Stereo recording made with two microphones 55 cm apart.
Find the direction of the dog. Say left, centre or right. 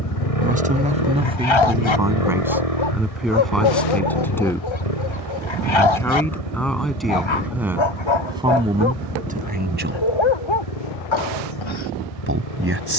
left.